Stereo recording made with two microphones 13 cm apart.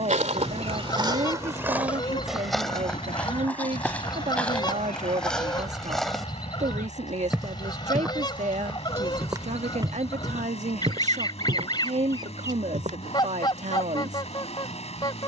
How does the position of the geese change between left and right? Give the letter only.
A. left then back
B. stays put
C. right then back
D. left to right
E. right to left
B.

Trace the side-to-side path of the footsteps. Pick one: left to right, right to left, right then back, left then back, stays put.
left then back.